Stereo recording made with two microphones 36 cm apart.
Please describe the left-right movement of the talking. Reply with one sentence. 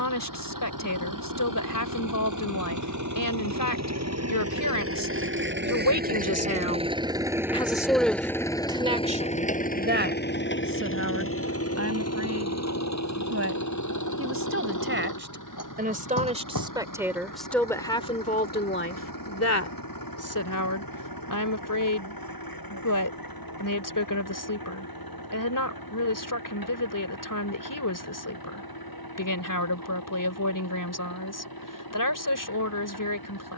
In this clip you hear the talking move from left to right and back again.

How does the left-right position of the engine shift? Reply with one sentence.
In this clip you hear the engine go from the right side to the left.